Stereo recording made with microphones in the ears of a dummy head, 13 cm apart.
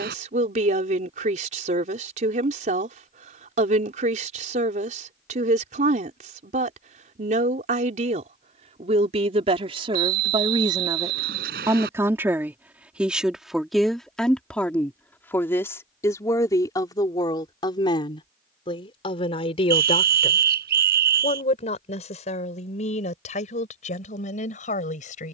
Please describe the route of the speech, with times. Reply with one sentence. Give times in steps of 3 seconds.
In this clip you hear the speech on the right from 0 s, in the centre from 12 s and on the left from 15 s.